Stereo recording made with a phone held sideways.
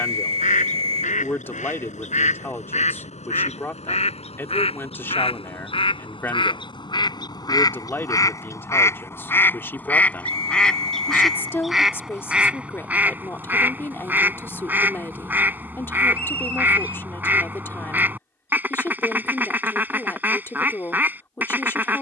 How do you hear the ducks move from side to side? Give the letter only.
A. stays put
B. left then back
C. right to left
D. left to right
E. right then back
D.